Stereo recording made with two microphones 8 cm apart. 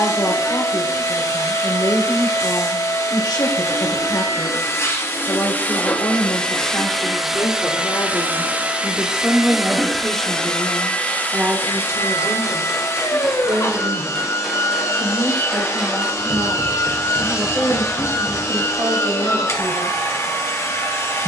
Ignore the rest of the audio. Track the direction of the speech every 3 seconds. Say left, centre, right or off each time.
left, left, left, centre, right, right, right.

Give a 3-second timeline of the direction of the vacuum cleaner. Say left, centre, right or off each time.
left, left, centre, centre, left, left, left.